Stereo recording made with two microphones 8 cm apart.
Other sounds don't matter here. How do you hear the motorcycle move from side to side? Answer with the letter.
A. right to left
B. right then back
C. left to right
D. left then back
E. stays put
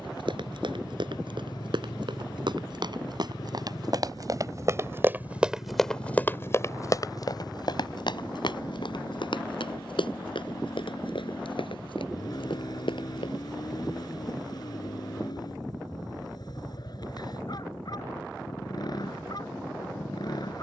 E.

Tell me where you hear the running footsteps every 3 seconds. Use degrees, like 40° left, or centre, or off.
70° right, 40° right, 50° left, 80° left, 80° left, off, off.